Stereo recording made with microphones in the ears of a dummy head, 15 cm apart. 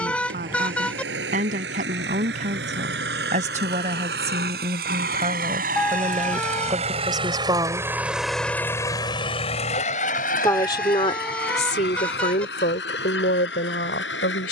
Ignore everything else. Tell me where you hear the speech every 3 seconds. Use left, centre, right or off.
right, right, right, left, left.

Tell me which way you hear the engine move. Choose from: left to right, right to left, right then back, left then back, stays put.
right to left.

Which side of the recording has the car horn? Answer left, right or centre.
centre.